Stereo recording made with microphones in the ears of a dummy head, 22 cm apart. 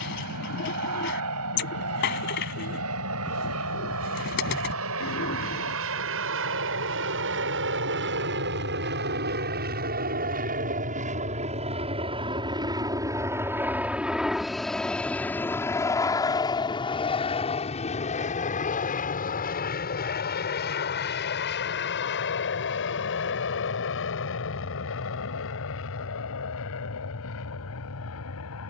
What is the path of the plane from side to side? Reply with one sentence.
You can hear the plane go from the right side to the left.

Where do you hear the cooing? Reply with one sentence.
In this clip you hear the cooing on the left.